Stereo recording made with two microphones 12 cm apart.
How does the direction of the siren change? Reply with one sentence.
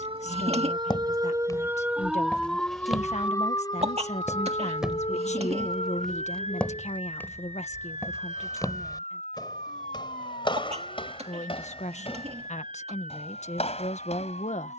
You can hear the siren travel towards the left.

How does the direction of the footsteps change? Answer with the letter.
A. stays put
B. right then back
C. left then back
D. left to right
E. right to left
B.